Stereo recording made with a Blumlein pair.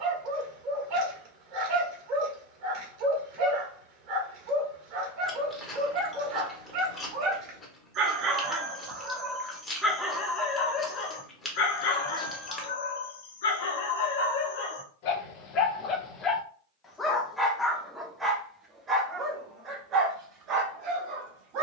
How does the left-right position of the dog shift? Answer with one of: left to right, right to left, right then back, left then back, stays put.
left then back.